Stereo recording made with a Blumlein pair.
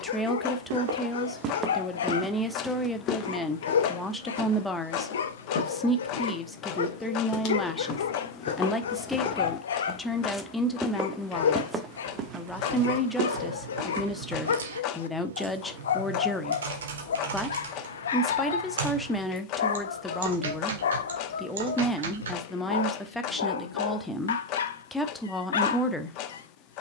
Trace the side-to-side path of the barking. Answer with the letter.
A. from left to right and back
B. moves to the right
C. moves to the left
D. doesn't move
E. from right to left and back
D.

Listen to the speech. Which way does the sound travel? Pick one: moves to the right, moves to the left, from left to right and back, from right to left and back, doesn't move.
doesn't move.